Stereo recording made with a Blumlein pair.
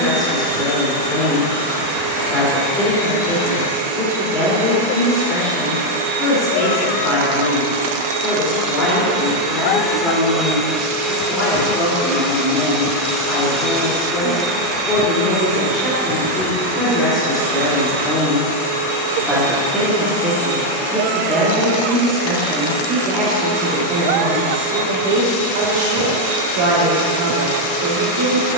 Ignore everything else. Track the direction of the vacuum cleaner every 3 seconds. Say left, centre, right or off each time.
right, right, right, centre, centre, right, right, right, right, right.